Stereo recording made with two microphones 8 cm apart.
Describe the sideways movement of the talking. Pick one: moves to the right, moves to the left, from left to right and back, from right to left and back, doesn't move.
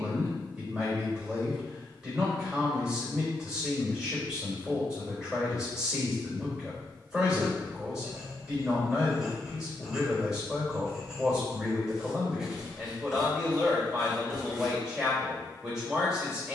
doesn't move.